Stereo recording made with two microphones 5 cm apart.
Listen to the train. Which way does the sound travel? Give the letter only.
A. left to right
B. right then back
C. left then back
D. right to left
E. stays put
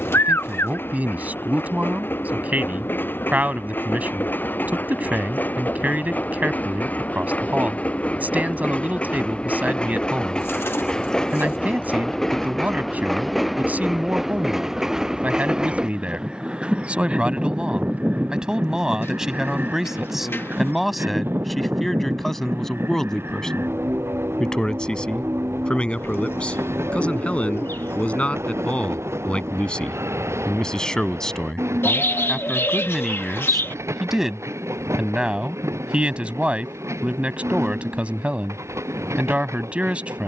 A.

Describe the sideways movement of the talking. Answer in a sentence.
In this clip you hear the talking go left and come back.